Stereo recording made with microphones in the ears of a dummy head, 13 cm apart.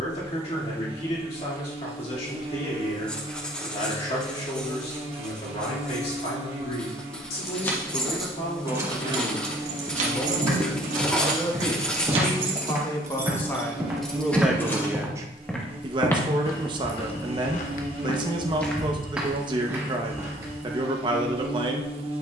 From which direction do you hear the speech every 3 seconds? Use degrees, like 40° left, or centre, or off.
50° left, 50° left, 50° left, 40° left, 10° left, 30° right, 30° right, 30° right.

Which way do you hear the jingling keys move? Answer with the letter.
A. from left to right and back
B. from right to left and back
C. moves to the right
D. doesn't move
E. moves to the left
A.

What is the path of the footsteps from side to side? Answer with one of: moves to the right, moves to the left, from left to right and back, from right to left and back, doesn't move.
from right to left and back.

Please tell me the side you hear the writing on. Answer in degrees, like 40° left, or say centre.
10° left.